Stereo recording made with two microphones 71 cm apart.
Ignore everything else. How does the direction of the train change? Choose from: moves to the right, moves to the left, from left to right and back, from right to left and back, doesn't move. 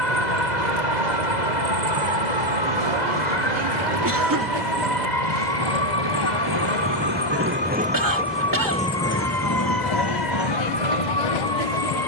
moves to the left.